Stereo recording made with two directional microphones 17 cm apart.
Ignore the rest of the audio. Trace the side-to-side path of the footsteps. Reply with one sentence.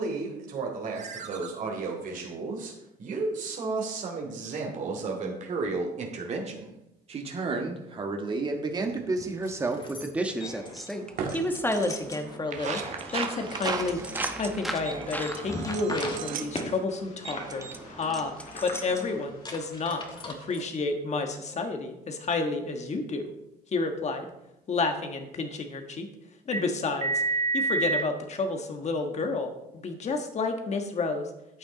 You can hear the footsteps go from the right side to the left.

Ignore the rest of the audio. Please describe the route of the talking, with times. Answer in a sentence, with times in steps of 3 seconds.
You can hear the talking on the right from 0 s, in the centre from 9 s and on the left from 12 s.